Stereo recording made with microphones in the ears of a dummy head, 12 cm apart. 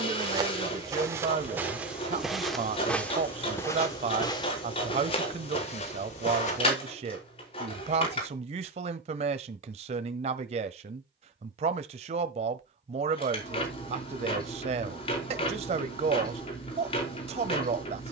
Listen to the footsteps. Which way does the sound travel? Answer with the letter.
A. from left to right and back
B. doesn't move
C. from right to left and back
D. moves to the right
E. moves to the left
E.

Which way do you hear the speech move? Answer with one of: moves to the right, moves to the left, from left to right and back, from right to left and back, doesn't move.
doesn't move.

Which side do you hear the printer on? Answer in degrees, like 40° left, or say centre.
40° left.